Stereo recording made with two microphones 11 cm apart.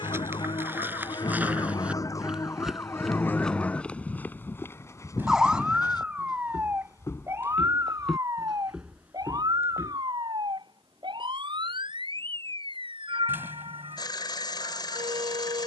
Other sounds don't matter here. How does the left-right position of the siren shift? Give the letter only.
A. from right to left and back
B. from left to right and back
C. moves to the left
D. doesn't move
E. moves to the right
E.